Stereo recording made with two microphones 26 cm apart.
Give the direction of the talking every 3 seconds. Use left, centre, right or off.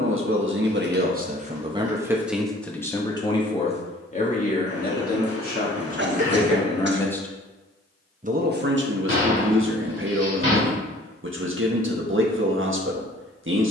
right, left, centre, right, right.